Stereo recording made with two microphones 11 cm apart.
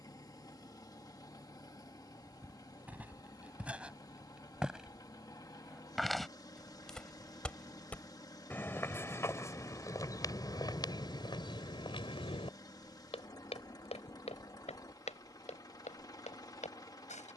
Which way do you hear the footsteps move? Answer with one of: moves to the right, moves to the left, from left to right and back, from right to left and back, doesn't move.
moves to the left.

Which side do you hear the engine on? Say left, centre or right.
left.